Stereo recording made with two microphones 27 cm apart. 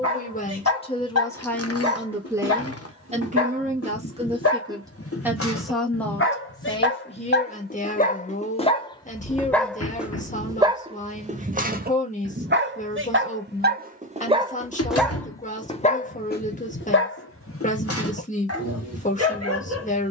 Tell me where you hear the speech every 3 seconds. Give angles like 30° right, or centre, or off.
10° left, 20° right, 20° left, 30° left, 30° left, 30° left, 30° left.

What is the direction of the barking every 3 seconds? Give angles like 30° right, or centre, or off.
70° left, 60° left, 40° left, 10° right, 30° right, 40° left, 60° left.